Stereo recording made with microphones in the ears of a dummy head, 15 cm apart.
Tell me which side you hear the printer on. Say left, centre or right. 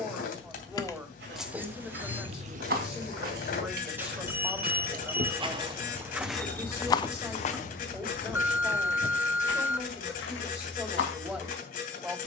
left.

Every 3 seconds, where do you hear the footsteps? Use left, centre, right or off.
right, right, left, left.